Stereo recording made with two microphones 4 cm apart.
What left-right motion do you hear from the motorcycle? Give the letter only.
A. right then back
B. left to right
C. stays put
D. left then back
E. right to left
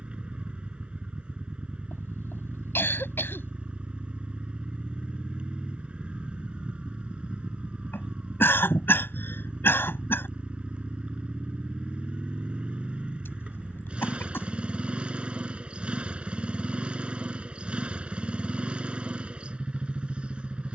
C.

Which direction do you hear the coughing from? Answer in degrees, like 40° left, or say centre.
70° left.